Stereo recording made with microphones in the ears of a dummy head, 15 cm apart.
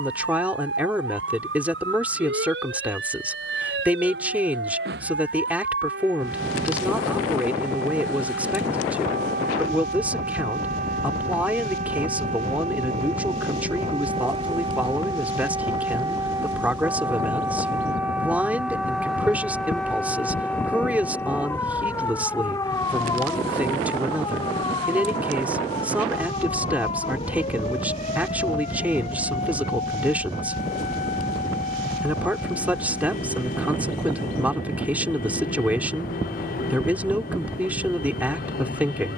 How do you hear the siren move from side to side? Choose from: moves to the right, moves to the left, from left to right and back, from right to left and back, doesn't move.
moves to the left.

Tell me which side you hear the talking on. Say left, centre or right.
centre.